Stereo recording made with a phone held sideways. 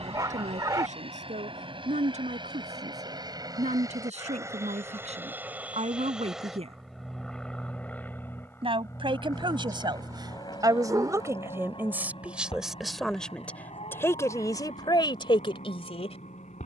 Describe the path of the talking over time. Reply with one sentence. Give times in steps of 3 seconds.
You can hear the talking on the right from 0 s, in the centre from 12 s and on the left from 15 s.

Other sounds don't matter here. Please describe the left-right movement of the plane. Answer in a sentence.
In this clip you hear the plane move to the left.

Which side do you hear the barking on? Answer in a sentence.
In this clip you hear the barking on the right.